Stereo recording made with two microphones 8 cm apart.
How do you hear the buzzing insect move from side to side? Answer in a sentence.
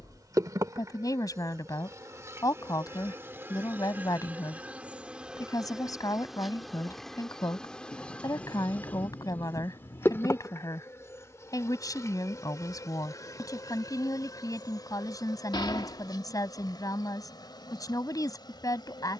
In this clip you hear the buzzing insect go from the right side to the left.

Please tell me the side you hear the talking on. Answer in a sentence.
You can hear the talking on the left.